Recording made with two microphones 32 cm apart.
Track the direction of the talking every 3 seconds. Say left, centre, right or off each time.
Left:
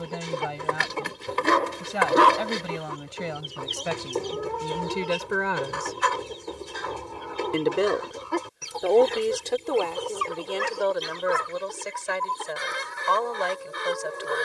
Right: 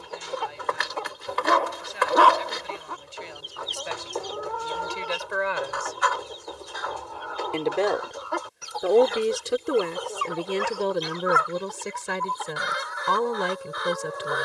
left, left, centre, right, right.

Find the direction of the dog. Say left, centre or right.
left.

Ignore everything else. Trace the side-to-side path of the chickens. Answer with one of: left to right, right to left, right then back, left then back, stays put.
stays put.